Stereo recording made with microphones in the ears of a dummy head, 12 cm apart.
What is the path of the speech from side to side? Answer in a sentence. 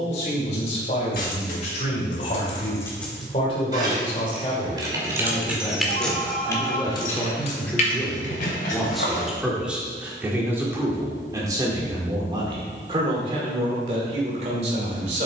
You can hear the speech move from left to right.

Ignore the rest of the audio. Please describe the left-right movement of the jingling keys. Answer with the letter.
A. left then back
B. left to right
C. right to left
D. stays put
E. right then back
E.